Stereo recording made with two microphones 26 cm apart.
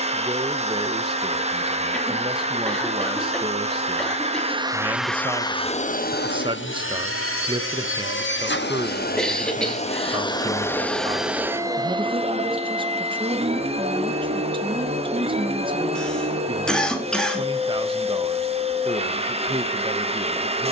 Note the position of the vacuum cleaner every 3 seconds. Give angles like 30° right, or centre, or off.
20° right, 10° right, 40° left, 10° left, 20° right, 20° right, 20° right.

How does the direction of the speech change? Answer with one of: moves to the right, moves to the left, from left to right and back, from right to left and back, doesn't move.
doesn't move.